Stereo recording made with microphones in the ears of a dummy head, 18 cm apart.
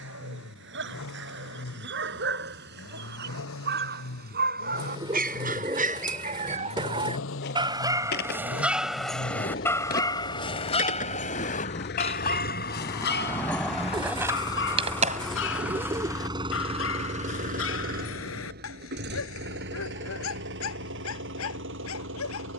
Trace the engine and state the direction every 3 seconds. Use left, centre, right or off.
left, left, left, left, left, right, right, right.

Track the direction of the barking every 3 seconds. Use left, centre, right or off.
right, right, right, left, left, left, left, left.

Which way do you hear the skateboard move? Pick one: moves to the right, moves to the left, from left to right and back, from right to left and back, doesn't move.
moves to the right.